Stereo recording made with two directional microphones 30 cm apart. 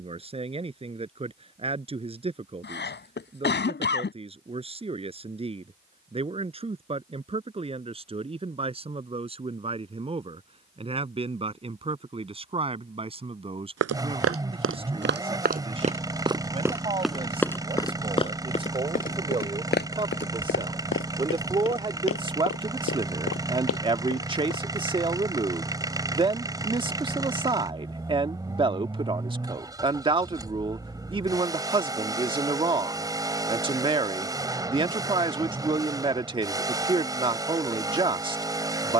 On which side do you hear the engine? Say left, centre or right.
centre.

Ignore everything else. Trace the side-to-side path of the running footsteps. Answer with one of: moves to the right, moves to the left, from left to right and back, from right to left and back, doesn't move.
moves to the left.